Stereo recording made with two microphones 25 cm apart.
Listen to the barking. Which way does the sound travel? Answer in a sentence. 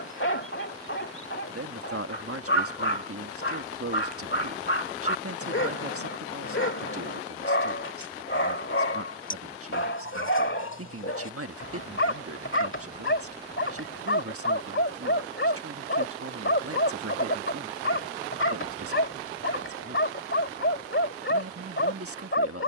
In this clip you hear the barking stay put.